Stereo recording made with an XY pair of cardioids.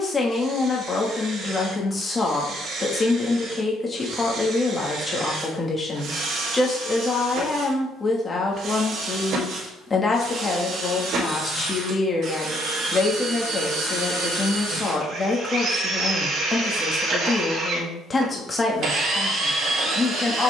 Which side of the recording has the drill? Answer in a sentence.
In this clip you hear the drill on the right.